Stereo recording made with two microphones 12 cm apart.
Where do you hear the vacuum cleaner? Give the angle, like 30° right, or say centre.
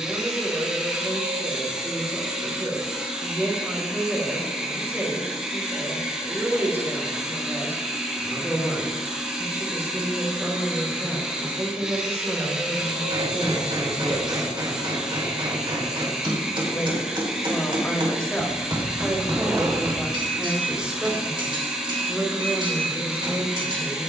10° right.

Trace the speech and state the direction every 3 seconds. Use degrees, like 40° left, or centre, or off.
20° right, 20° right, 20° right, 20° right, 10° right, 20° left, centre, 20° right.